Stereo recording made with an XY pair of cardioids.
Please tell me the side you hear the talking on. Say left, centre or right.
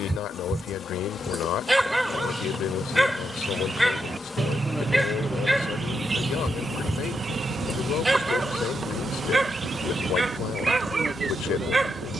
left.